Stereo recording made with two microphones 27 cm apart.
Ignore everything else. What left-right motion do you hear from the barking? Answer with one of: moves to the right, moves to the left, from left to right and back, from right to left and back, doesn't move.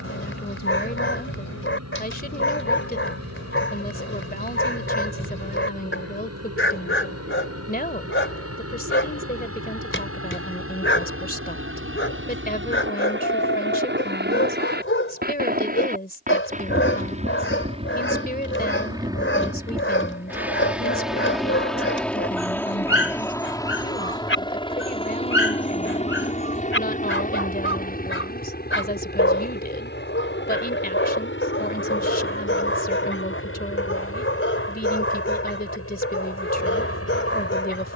doesn't move.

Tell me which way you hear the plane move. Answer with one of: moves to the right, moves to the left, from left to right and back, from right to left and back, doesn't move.
moves to the left.